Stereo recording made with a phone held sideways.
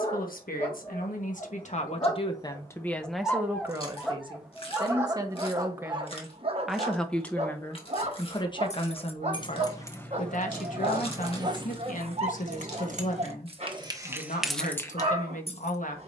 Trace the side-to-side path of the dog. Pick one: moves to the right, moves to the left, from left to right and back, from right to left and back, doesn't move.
moves to the right.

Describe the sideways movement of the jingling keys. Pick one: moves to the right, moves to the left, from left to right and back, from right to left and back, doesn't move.
from left to right and back.